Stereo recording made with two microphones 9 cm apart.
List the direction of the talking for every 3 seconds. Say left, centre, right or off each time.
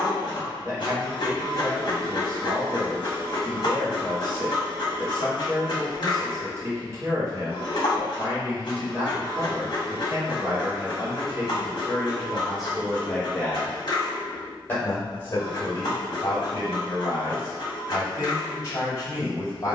right, right, right, right, centre, left, left.